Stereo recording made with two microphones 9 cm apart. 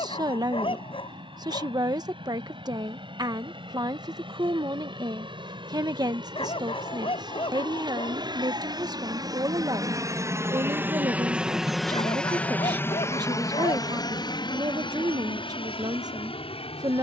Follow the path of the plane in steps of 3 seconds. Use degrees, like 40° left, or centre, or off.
80° right, 70° right, 60° right, 30° right, 30° left, 60° left.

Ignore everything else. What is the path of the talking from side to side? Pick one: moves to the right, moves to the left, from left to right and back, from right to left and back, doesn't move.
doesn't move.